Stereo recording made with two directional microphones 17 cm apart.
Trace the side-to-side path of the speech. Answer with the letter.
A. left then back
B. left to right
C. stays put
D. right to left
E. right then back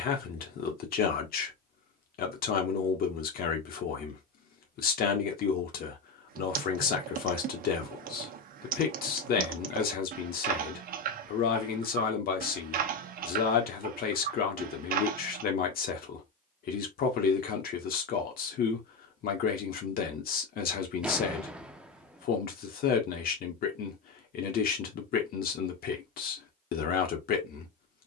C.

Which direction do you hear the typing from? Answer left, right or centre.
right.